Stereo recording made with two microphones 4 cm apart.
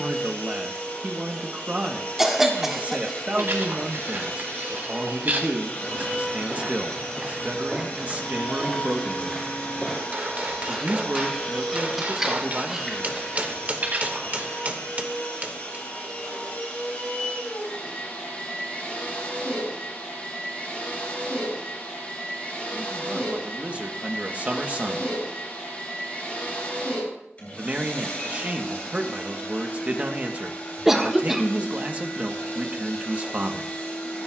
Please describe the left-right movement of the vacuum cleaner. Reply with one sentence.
You can hear the vacuum cleaner stay in one place.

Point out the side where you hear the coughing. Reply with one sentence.
In this clip you hear the coughing in the centre.